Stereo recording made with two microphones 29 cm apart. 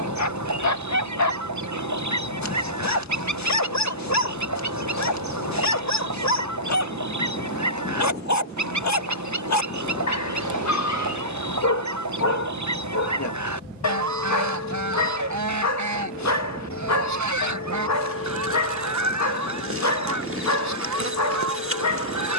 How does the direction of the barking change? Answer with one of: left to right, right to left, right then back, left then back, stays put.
stays put.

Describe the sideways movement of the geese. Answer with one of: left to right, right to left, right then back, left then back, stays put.
stays put.